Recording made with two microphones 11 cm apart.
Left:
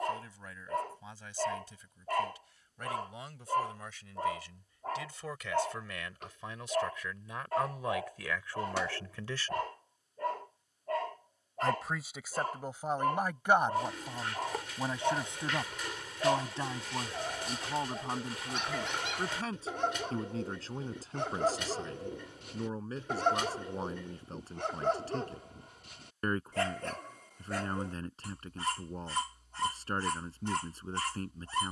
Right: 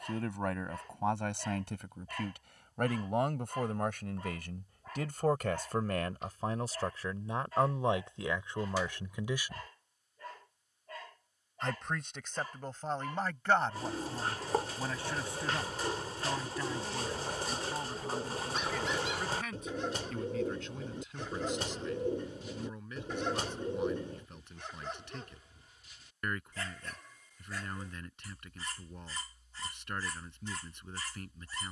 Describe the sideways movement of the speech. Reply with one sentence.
In this clip you hear the speech travel towards the left.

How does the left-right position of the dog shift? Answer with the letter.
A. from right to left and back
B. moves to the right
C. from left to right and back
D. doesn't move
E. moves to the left
D.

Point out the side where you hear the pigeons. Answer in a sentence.
You can hear the pigeons on the right.